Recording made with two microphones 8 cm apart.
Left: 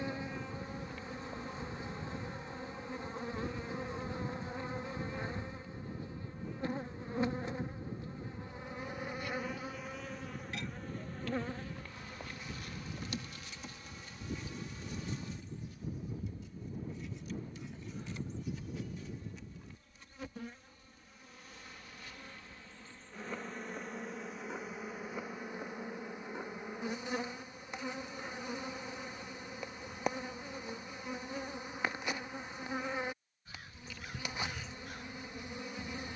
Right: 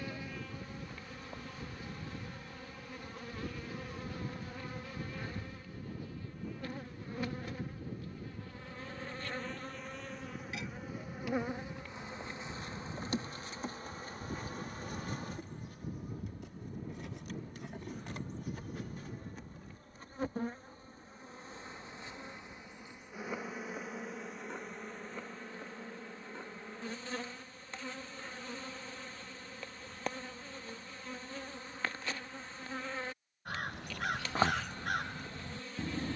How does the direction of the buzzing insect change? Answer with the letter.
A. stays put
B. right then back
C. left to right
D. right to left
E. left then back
B.